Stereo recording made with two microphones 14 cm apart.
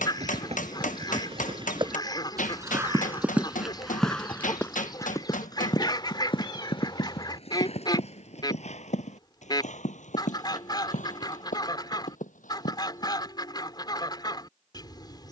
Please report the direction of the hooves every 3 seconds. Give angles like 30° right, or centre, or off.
40° right, 10° left, 50° left, 60° left, 70° left.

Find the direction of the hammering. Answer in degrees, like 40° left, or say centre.
70° left.